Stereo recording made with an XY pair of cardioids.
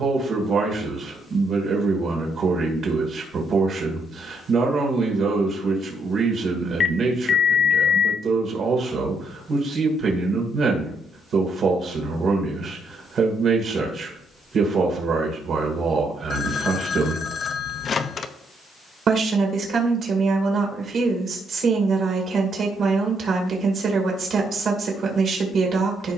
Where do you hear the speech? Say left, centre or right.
right.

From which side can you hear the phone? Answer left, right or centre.
left.